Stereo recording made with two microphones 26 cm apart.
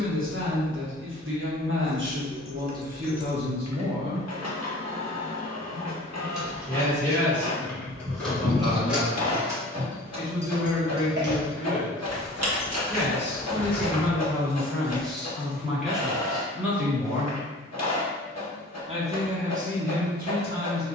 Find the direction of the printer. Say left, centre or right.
left.